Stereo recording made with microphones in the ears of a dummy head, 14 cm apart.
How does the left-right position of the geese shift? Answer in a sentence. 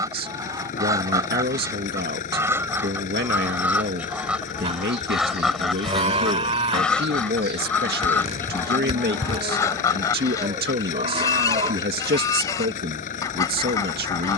In this clip you hear the geese travel towards the left.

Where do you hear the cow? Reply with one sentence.
In this clip you hear the cow on the right.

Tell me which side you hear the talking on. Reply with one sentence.
In this clip you hear the talking on the right.